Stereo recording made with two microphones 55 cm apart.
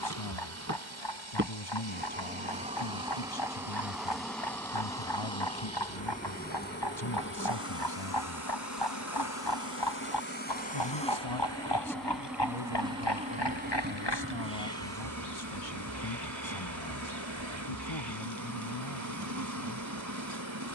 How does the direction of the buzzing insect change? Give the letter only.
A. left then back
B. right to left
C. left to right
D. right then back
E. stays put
A.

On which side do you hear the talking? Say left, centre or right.
left.